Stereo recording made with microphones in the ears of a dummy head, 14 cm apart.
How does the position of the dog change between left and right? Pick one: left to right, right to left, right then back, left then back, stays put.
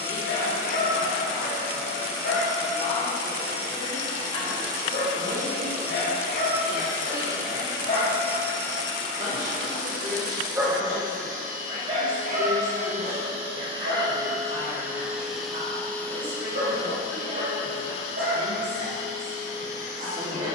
left to right.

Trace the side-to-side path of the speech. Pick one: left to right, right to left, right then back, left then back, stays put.
left to right.